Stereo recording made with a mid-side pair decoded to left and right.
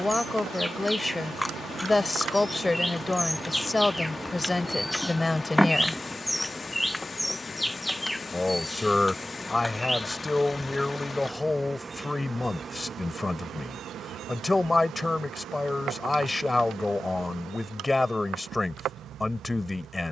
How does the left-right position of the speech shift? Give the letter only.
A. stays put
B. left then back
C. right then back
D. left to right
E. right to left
A.